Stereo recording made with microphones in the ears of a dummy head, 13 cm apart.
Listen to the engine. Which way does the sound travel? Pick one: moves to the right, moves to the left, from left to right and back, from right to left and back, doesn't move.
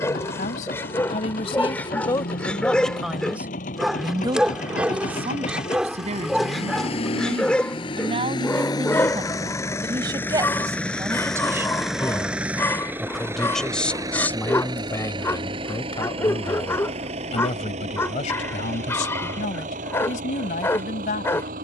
moves to the right.